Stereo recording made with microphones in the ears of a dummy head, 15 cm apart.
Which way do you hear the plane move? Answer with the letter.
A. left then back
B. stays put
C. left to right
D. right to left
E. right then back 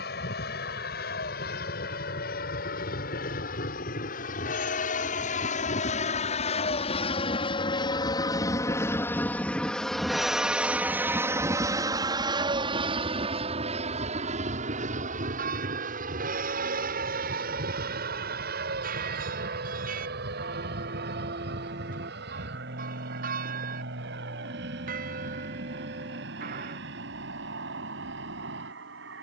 C.